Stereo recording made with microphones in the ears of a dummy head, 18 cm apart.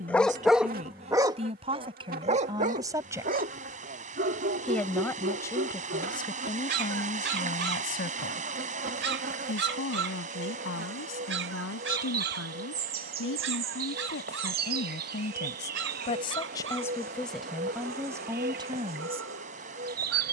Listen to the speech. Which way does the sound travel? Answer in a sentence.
In this clip you hear the speech go left and come back.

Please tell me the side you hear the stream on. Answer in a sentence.
In this clip you hear the stream on the right.